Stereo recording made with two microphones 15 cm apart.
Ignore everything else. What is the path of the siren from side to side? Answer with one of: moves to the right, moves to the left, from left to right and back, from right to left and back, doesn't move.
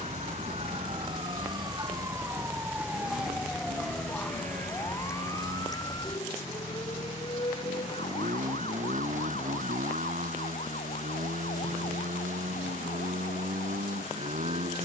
moves to the left.